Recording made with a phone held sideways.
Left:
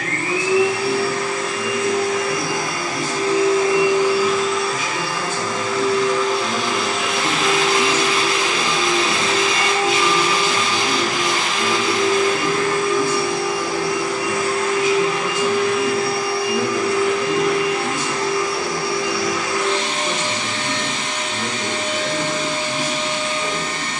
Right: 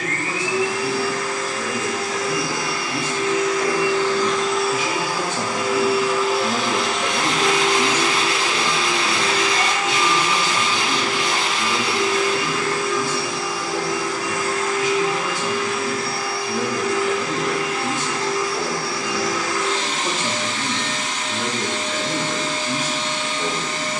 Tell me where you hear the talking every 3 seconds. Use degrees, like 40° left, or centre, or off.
80° right, 70° right, 20° right, 30° left, 40° left, centre, 50° right, 80° right.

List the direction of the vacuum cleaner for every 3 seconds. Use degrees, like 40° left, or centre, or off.
60° left, 10° left, 10° left, 40° left, 60° left, 60° left, 60° left, 60° left.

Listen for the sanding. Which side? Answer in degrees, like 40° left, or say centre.
70° right.